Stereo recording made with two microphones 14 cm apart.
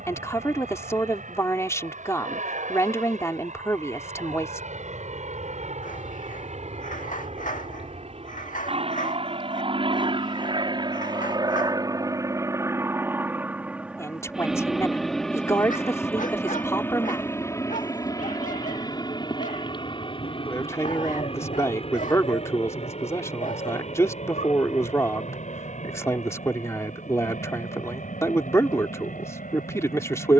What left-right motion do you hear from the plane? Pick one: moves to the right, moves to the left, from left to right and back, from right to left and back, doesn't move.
moves to the left.